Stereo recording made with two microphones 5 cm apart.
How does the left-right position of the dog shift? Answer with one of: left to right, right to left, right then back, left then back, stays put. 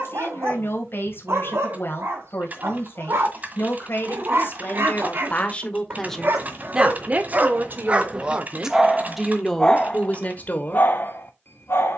right to left.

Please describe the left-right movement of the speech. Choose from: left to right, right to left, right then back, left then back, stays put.
right then back.